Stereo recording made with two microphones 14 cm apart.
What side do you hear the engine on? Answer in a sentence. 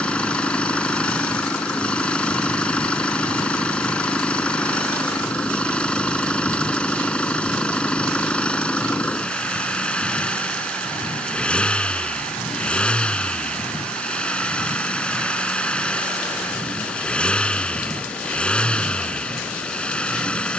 You can hear the engine in the centre.